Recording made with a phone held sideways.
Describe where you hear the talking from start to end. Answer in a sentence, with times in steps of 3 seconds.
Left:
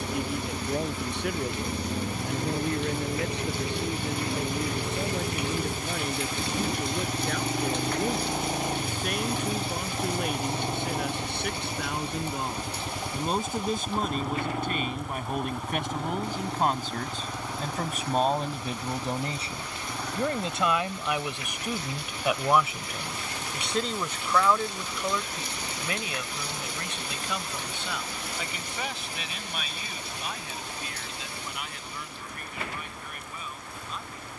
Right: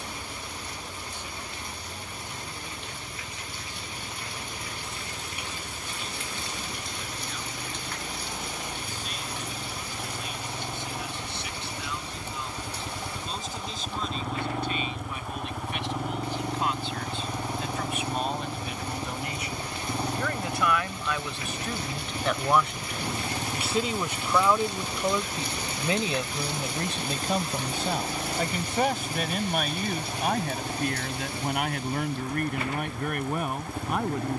In this clip you hear the talking on the left from 0 s, in the centre from 21 s and on the right from 24 s.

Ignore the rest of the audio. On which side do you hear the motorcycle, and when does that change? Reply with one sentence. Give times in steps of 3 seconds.
You can hear the motorcycle on the left from 0 s, in the centre from 12 s and on the right from 18 s.